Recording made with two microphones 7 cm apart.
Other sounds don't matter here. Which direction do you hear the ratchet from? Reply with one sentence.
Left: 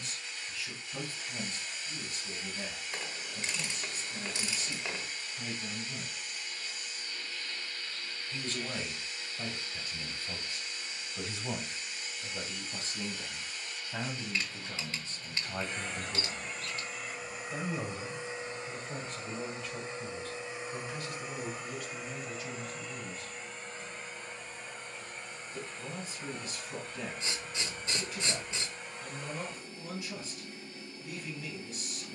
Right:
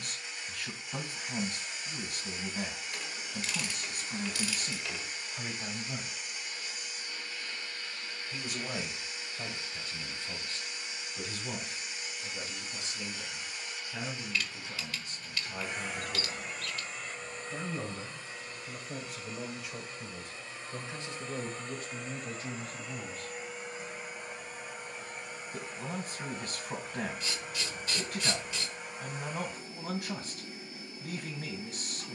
In this clip you hear the ratchet on the left.